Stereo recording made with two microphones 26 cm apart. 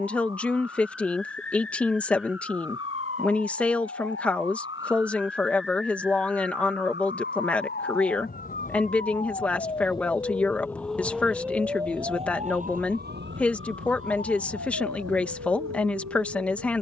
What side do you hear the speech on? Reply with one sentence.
In this clip you hear the speech in the centre.